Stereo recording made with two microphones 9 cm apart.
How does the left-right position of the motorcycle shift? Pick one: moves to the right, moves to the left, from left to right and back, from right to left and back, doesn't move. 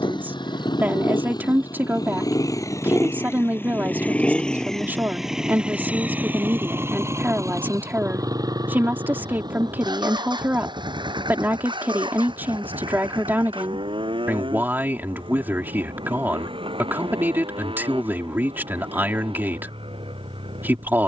moves to the right.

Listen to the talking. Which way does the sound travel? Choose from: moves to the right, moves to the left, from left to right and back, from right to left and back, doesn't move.
doesn't move.